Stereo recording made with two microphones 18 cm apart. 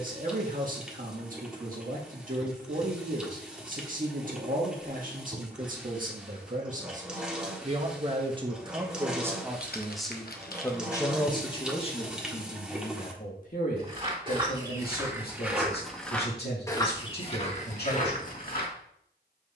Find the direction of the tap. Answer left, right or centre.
centre.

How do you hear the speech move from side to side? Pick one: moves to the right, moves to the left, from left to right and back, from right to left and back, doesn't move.
moves to the left.